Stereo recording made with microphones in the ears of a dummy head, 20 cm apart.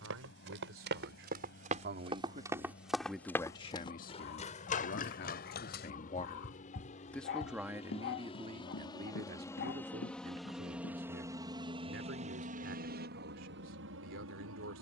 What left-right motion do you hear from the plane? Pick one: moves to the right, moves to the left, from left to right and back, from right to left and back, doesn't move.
moves to the right.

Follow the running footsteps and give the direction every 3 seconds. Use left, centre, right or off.
right, left, left, left, off.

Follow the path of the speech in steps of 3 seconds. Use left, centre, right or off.
right, left, centre, right, right.